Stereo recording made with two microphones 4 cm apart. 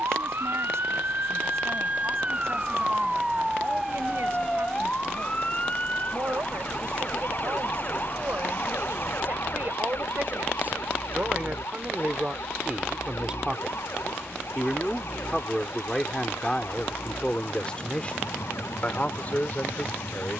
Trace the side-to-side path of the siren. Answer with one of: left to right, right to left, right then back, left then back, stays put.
right to left.